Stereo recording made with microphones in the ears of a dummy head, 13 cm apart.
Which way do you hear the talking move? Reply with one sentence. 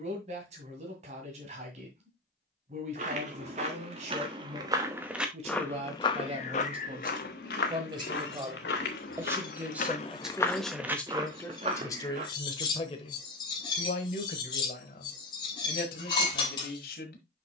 You can hear the talking move from right to left.